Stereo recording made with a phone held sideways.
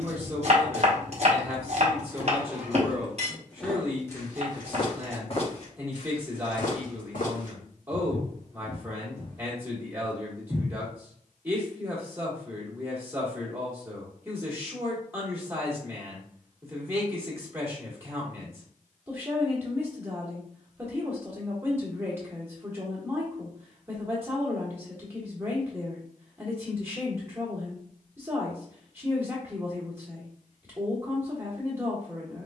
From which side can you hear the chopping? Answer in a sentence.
In this clip you hear the chopping on the right.